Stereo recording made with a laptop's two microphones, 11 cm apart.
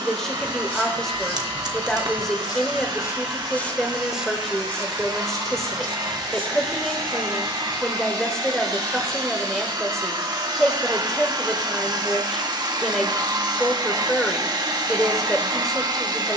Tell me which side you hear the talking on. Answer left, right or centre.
centre.